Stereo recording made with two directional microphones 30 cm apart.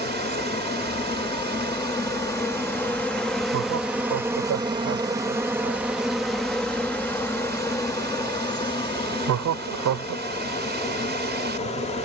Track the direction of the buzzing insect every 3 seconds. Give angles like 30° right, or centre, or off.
20° left, 10° right, 10° left, 20° left.